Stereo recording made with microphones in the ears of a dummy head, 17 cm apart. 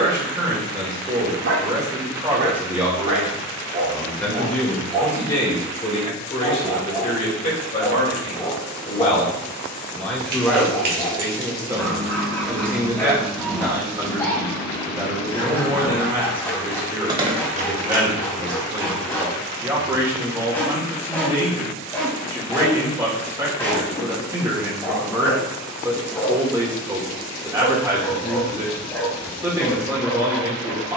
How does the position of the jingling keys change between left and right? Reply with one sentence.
You can hear the jingling keys move from right to left and back again.